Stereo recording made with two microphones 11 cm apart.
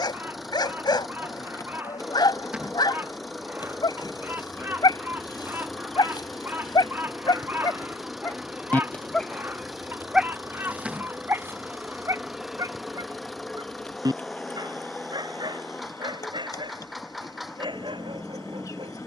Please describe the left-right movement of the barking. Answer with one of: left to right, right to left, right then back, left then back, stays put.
left to right.